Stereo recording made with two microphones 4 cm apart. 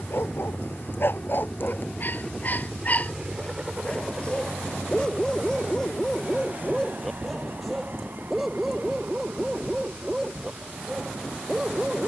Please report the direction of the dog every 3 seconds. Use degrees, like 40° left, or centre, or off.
50° left, 20° left, 10° left, 10° right.